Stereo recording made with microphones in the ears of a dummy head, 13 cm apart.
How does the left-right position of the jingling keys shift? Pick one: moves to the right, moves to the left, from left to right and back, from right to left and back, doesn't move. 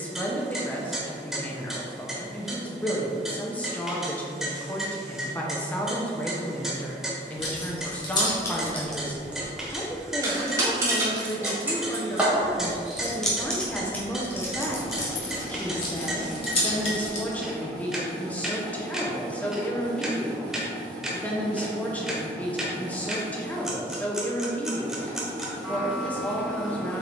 from left to right and back.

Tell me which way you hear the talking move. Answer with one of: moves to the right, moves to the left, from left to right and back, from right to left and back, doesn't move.
doesn't move.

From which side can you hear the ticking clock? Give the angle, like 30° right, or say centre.
centre.